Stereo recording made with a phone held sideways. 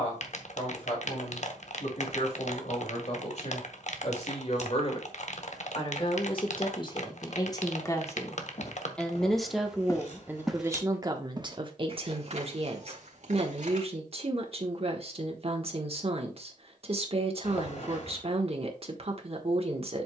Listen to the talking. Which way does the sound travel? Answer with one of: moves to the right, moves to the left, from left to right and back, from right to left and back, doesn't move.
moves to the right.